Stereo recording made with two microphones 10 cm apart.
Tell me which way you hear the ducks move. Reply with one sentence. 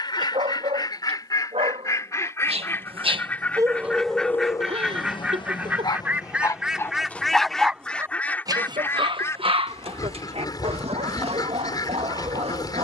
You can hear the ducks go right and come back.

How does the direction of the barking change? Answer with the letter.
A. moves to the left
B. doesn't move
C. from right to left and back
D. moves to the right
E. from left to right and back
C.